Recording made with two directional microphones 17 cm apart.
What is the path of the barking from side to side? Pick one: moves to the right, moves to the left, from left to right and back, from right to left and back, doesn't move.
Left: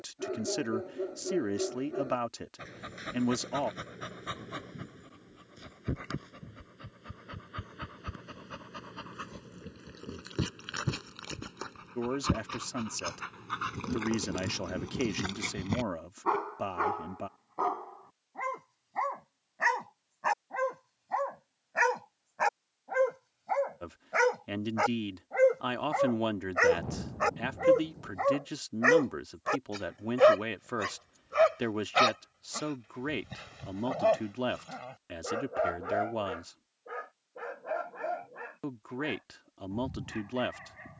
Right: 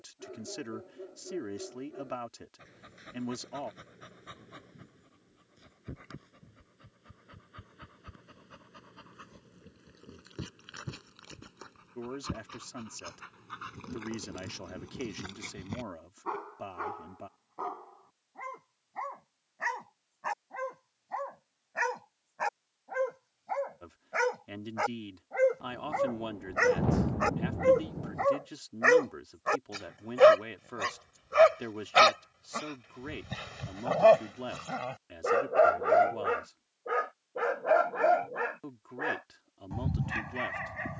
moves to the right.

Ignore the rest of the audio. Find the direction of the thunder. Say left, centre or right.
right.